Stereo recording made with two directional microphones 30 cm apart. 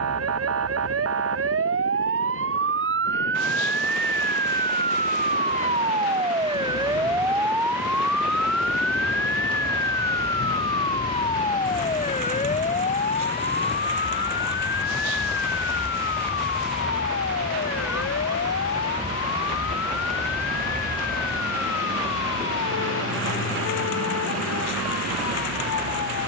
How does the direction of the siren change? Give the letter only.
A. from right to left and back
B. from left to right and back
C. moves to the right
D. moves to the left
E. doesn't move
D.